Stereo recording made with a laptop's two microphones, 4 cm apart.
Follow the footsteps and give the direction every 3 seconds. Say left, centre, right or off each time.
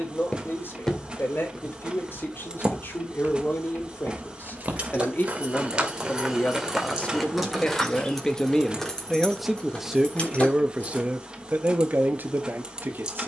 centre, right, centre, off, off.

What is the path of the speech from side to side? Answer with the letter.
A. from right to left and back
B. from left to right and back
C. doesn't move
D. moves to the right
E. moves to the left
D.